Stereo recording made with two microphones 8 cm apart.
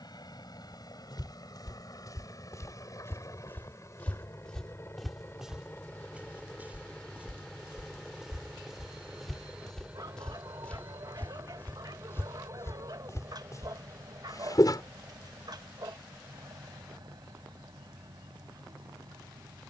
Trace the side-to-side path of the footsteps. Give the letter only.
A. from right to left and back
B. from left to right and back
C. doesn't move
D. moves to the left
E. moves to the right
B.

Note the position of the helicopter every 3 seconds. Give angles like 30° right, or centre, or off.
50° left, 30° left, 10° left, 20° right, 40° right, 50° right, 50° right.